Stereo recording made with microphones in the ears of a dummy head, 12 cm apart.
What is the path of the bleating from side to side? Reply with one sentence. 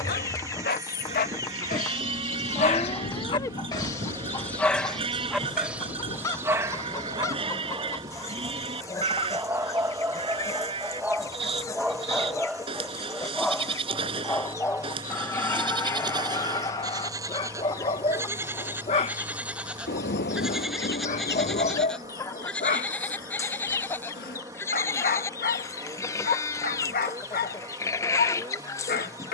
In this clip you hear the bleating move from right to left.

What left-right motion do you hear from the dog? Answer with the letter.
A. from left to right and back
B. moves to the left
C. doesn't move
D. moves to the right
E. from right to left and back
A.